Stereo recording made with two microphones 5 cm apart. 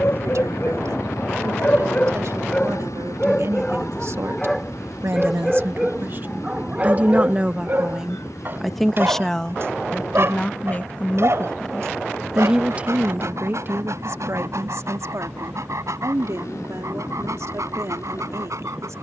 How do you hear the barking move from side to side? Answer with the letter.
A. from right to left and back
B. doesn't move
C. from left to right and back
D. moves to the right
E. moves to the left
D.